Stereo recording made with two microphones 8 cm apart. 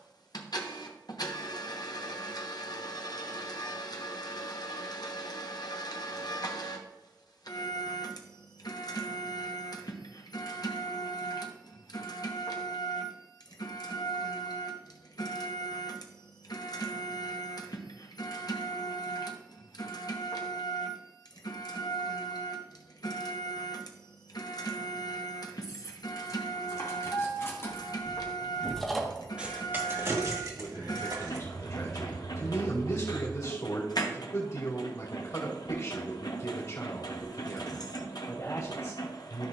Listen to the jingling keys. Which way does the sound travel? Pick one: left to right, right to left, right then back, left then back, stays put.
left to right.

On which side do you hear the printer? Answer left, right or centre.
left.